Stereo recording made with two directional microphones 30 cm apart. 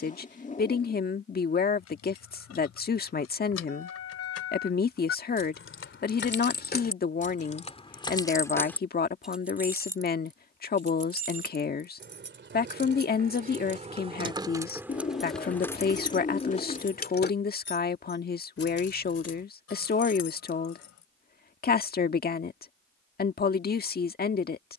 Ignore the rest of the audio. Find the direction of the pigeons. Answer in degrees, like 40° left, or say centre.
20° left.